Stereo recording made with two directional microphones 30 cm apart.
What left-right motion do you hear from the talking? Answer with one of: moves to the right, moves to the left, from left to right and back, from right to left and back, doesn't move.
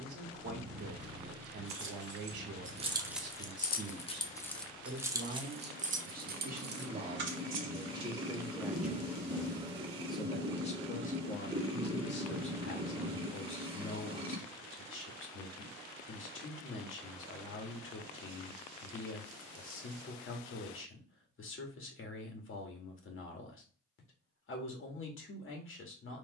moves to the left.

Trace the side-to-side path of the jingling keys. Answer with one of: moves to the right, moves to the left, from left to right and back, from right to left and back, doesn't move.
from right to left and back.